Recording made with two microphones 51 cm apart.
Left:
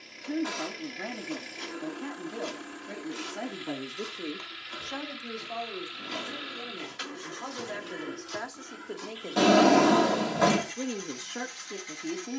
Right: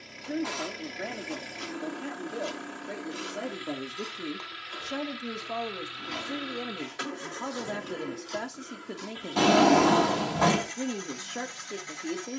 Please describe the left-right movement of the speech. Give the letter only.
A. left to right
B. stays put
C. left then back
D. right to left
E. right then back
E.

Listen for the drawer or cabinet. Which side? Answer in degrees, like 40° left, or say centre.
20° right.